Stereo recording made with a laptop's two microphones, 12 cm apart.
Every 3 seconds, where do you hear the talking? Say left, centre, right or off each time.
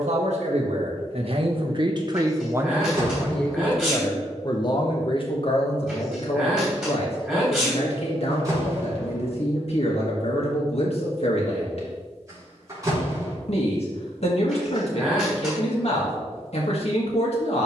right, left, left, left, left, left.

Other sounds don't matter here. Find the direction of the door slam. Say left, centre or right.
right.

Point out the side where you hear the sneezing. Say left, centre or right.
centre.